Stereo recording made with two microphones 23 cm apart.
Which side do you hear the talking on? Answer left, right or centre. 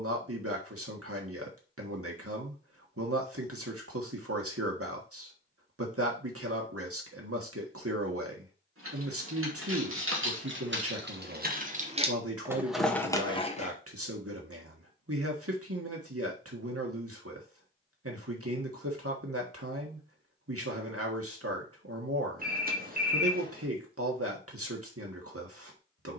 right.